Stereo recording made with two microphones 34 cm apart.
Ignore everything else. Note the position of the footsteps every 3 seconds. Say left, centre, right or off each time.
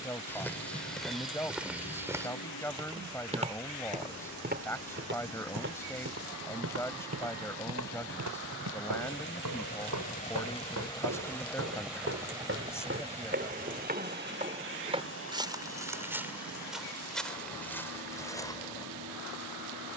centre, right, right, right, right, centre, centre.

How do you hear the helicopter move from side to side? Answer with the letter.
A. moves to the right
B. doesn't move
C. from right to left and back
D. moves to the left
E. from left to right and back
A.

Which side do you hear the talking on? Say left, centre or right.
centre.